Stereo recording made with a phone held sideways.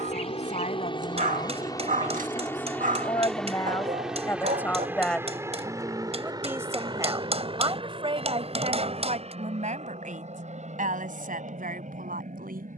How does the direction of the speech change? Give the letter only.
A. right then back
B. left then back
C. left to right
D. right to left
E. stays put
C.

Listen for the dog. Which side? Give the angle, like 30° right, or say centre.
60° right.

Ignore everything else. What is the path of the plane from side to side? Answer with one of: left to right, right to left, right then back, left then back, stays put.
left to right.